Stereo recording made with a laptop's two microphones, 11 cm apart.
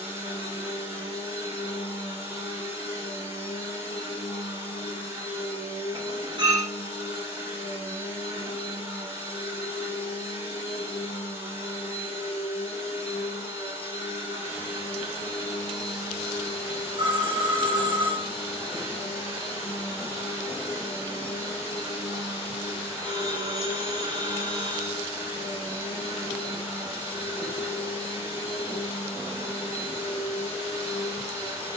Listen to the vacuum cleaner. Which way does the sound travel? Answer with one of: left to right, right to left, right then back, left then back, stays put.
stays put.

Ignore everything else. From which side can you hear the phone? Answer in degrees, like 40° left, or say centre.
40° right.